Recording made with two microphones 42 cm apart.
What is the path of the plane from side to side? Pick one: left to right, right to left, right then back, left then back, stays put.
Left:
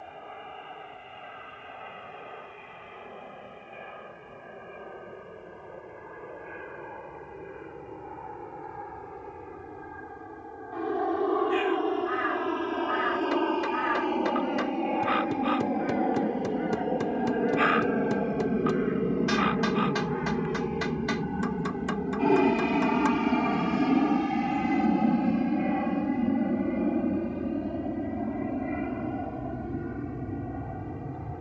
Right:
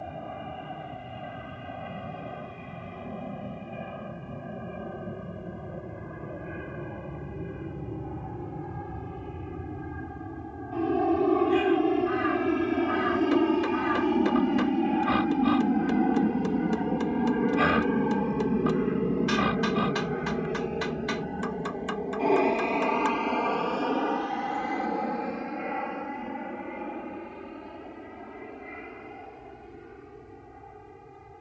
right to left.